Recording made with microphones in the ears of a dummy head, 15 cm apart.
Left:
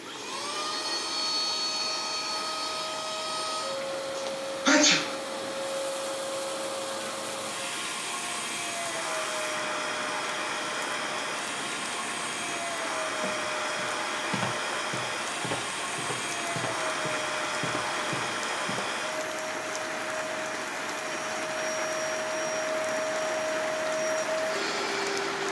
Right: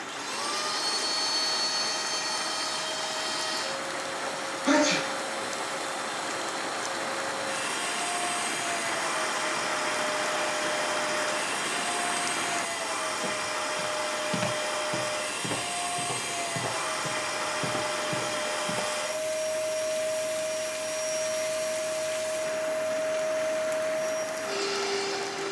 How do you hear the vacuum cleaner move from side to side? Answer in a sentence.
You can hear the vacuum cleaner stay put.